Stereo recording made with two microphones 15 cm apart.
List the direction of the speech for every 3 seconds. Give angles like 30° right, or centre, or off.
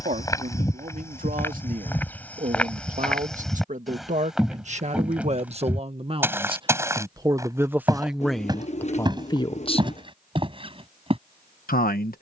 60° right, 50° right, 10° right, 40° left.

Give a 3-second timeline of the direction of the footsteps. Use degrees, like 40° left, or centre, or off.
10° left, centre, 20° right, 30° right.